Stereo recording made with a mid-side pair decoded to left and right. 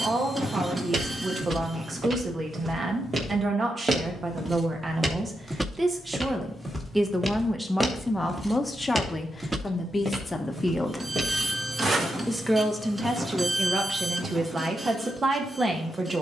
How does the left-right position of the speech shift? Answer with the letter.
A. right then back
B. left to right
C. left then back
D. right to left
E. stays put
C.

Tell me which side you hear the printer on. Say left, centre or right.
right.